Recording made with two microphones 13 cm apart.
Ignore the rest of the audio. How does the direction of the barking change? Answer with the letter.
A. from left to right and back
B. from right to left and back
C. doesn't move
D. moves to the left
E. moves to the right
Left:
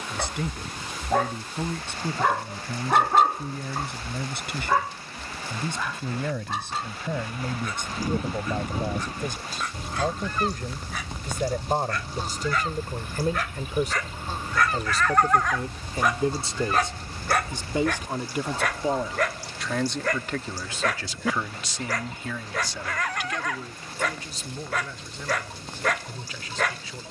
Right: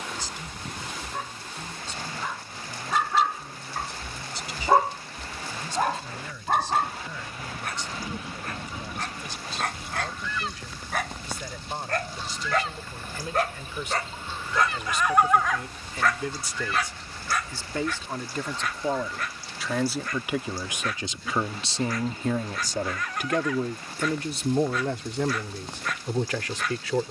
A.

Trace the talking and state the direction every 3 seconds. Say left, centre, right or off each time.
left, left, left, left, left, left, centre, right, right.